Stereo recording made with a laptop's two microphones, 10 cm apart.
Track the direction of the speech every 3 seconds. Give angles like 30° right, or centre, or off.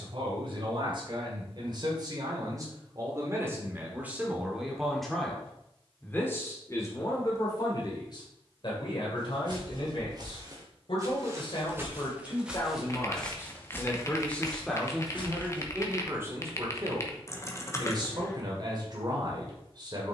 50° right, 10° right, 40° left, 50° left, 30° left, 20° right, 40° right.